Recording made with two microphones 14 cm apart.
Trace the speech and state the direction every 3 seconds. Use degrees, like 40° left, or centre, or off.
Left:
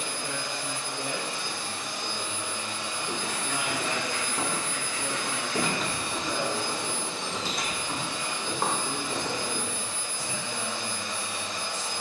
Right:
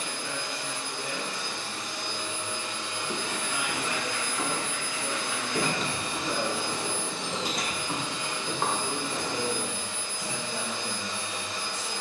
50° left, 30° left, 10° right, 50° right.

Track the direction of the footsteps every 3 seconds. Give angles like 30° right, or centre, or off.
off, 30° left, 10° right, 30° left.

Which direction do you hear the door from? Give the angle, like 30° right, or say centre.
centre.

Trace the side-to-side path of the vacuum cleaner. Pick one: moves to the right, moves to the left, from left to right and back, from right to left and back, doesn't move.
doesn't move.